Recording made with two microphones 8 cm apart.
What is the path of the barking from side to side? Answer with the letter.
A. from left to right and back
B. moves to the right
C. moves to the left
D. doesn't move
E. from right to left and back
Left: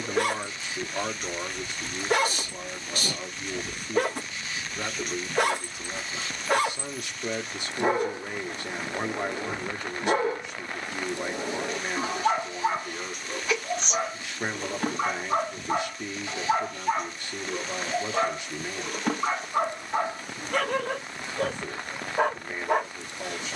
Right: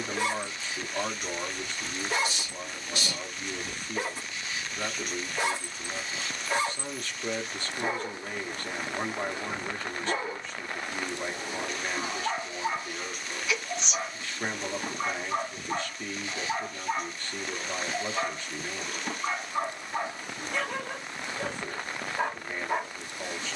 D.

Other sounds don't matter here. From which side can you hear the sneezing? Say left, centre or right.
left.